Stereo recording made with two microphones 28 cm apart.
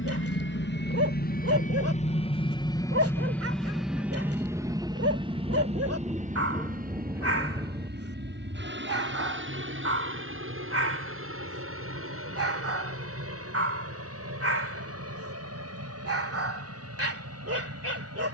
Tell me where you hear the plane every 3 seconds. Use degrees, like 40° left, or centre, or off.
30° left, 10° right, 30° right, 40° right, 50° right, 50° right.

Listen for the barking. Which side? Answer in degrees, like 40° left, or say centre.
60° right.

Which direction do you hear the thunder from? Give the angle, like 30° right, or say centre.
10° right.